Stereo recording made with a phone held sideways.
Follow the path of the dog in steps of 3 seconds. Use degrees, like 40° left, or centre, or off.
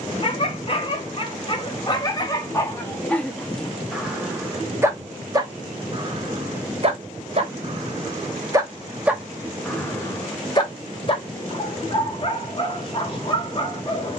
30° left, 10° right, 40° right, 20° left, 40° left.